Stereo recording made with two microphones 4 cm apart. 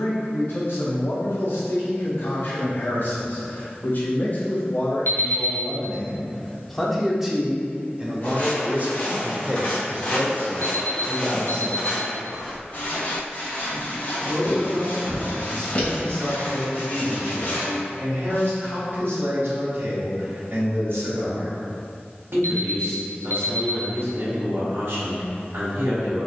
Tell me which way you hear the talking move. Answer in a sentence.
You can hear the talking go from the left side to the right.